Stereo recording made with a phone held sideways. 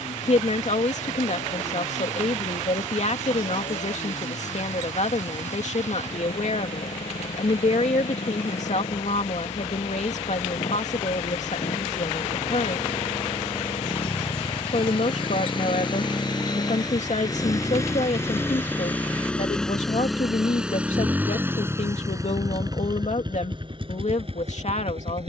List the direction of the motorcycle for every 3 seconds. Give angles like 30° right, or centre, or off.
70° left, 60° left, 60° left, 50° left, 50° left, 30° left, 10° left, 30° right, 50° right.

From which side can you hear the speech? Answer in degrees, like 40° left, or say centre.
60° left.